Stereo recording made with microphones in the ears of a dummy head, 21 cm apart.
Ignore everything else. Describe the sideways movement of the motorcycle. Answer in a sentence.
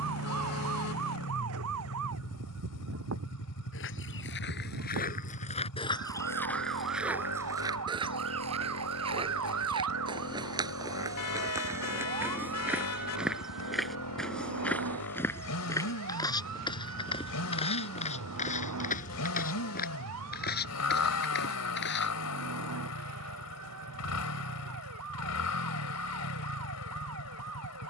You can hear the motorcycle stay put.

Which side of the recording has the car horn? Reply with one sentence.
You can hear the car horn on the left.